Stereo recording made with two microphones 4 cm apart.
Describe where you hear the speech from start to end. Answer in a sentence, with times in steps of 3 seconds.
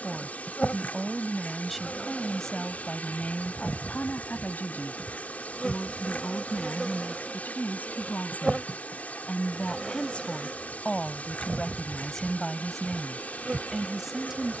In this clip you hear the speech in the centre from 0 s, on the left from 3 s and in the centre from 12 s.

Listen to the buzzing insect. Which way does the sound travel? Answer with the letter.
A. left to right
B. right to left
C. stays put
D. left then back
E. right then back
A.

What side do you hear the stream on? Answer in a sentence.
In this clip you hear the stream on the left.